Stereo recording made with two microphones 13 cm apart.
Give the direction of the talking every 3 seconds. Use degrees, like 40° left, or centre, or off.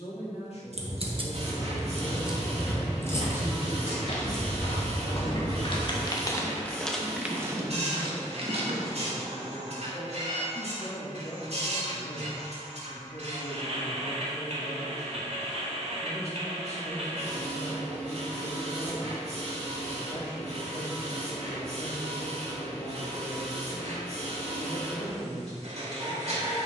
40° left, 40° right, 10° right, 50° left, 60° left, 60° left, 60° left, 60° left, 60° left.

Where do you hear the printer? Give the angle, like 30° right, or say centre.
60° right.